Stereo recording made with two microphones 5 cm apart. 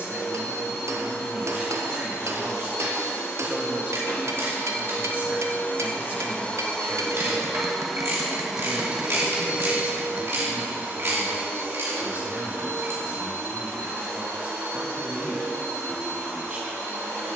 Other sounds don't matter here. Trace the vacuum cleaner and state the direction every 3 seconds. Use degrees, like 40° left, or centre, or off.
60° left, 50° left, 10° left, 40° right, 60° right, 60° right.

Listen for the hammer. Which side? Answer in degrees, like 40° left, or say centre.
70° right.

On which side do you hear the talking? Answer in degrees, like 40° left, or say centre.
30° right.